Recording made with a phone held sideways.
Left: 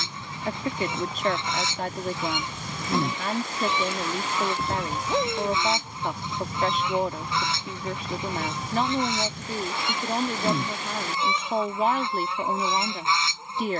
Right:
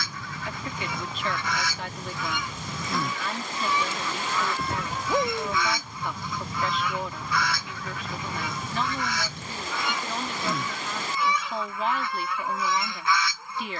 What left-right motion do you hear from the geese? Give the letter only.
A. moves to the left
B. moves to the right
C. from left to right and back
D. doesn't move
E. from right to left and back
D.